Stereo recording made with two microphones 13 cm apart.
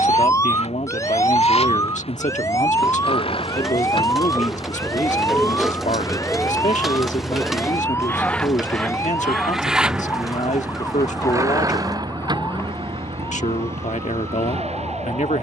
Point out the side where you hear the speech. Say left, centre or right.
left.